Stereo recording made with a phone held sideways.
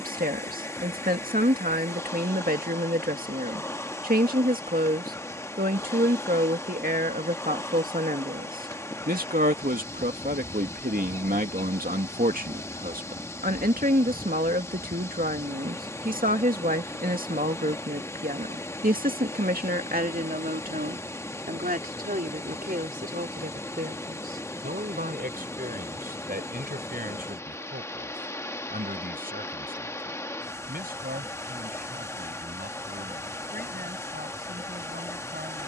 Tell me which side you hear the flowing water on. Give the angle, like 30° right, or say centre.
20° left.